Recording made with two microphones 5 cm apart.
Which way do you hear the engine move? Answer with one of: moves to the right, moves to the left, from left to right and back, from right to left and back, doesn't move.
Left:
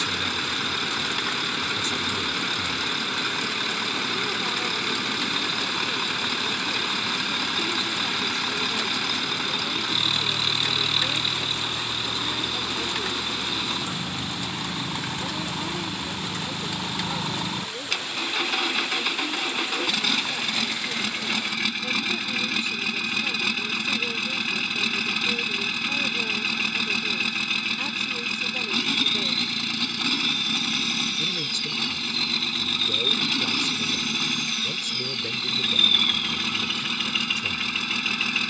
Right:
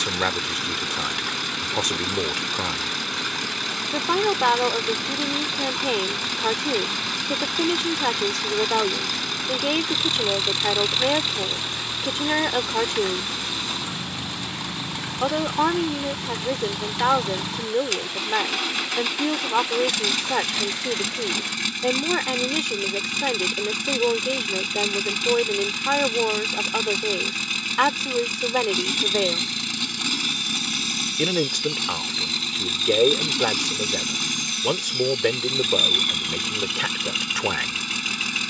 doesn't move.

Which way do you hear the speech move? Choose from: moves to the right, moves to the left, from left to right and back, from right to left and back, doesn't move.
doesn't move.